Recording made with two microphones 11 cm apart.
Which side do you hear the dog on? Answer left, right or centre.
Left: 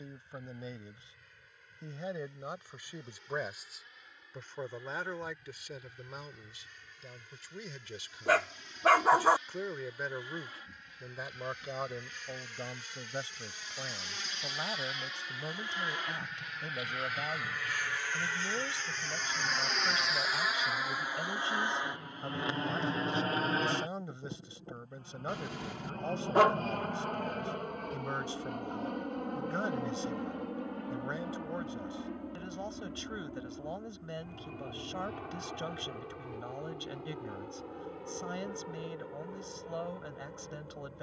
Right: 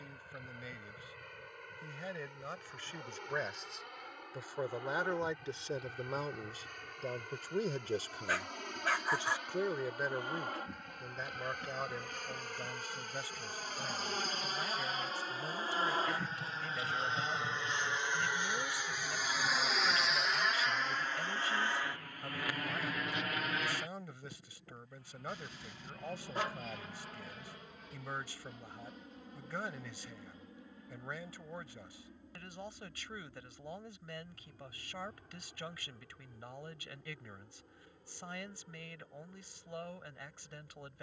left.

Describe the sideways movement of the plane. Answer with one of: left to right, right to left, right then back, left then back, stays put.
right to left.